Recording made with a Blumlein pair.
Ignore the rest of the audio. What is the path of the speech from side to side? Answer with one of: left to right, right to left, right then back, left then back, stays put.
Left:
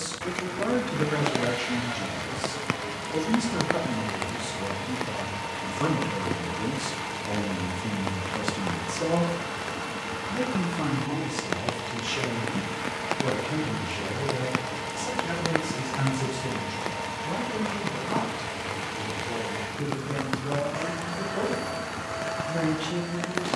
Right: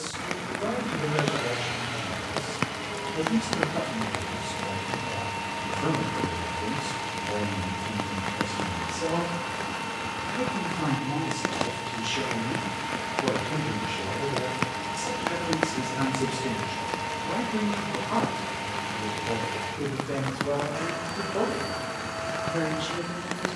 left to right.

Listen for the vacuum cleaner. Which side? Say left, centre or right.
centre.